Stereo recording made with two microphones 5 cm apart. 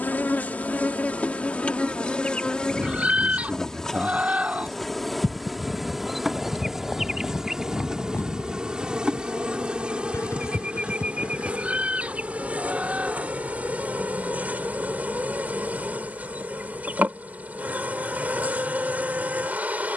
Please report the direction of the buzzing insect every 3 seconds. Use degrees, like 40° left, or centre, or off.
30° left, centre, 10° right, 30° right, 30° right, 40° right, 40° right.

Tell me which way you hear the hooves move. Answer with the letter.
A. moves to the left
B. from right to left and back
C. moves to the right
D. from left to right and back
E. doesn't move
A.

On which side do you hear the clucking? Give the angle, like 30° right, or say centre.
30° right.